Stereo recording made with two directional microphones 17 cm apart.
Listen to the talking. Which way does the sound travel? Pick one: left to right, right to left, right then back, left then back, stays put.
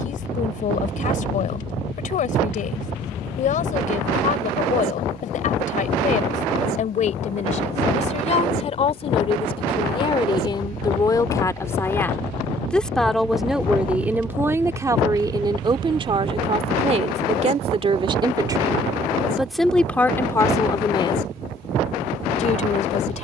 right then back.